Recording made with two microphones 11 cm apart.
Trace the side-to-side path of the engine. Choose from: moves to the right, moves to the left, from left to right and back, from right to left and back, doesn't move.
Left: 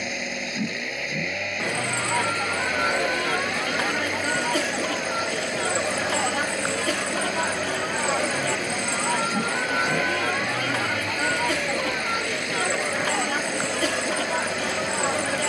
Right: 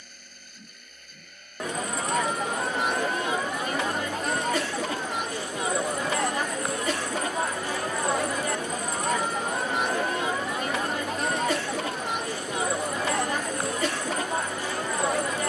doesn't move.